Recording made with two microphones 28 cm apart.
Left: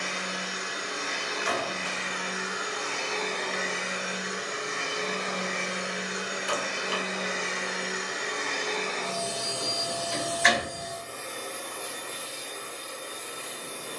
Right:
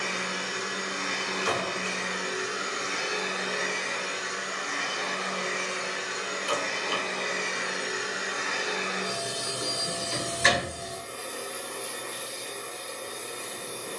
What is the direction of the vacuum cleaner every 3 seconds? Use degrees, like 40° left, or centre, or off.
50° right, 10° left, centre, 30° right, 50° right.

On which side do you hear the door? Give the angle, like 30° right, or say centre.
50° right.